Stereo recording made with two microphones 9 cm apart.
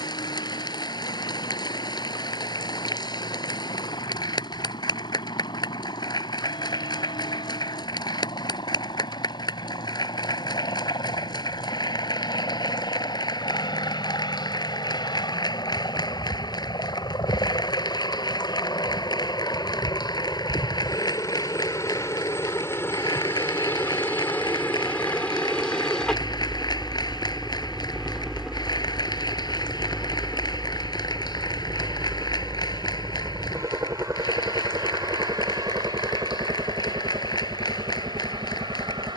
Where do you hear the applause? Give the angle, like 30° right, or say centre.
50° left.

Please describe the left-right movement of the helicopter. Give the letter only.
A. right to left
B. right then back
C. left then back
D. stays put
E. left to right
E.